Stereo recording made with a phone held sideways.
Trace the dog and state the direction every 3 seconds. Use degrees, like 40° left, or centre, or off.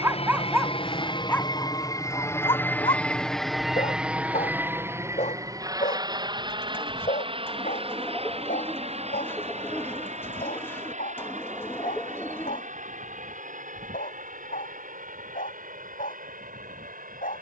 10° left, 50° left, 60° left, 70° left, 70° left, 70° left.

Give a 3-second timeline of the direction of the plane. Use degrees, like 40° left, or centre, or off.
30° left, 10° right, 30° right, 50° right, 50° right, 60° right.